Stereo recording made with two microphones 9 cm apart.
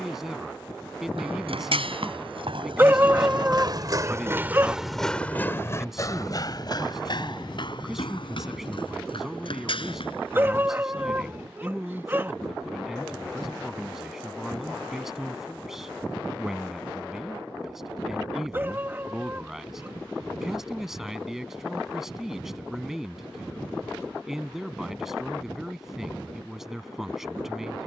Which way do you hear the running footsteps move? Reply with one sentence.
You can hear the running footsteps go from the right side to the left.